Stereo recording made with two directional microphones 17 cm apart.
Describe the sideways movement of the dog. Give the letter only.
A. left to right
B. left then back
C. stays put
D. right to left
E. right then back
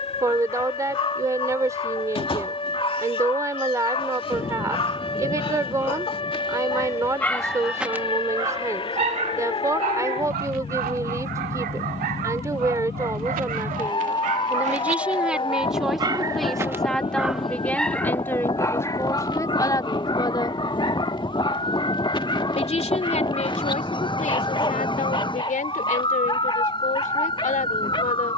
E.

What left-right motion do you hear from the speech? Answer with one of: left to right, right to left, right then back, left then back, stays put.
right to left.